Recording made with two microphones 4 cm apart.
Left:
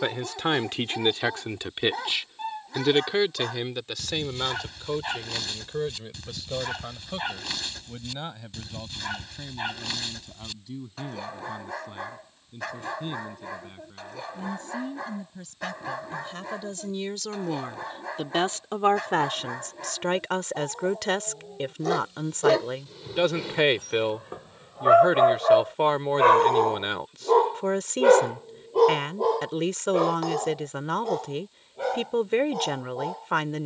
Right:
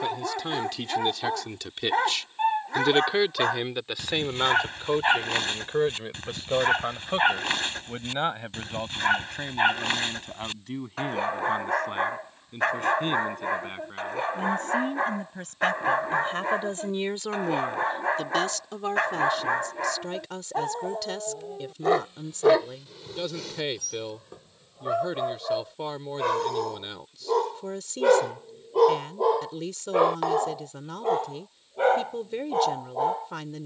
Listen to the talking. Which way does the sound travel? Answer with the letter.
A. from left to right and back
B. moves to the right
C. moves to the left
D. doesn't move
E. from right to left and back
A.